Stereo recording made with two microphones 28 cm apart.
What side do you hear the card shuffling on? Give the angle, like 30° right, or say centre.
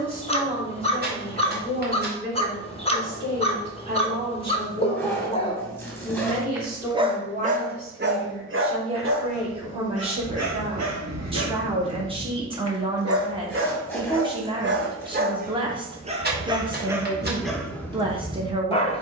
40° right.